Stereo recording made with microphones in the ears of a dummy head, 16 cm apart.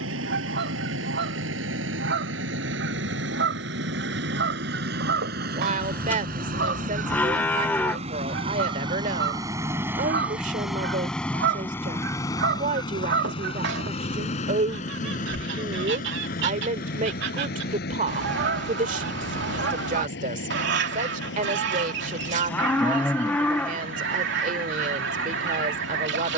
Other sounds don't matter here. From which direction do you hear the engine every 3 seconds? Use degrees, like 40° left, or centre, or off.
70° right, 60° right, 40° right, centre, 30° left, 50° left, 60° left, 60° left, 70° left.